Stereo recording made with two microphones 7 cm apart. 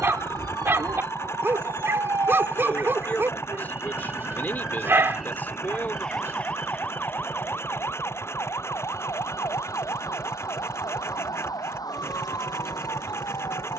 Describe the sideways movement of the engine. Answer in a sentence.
You can hear the engine stay put.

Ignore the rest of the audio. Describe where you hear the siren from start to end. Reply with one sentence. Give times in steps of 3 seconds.
In this clip you hear the siren on the right from 0 s, in the centre from 3 s and on the left from 6 s.